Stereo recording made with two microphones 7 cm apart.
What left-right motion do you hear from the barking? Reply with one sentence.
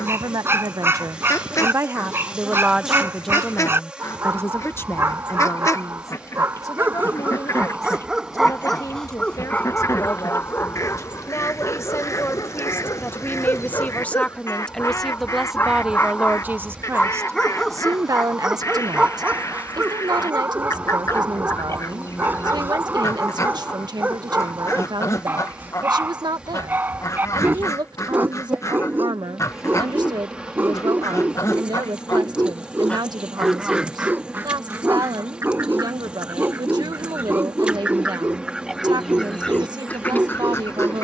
In this clip you hear the barking go left and come back.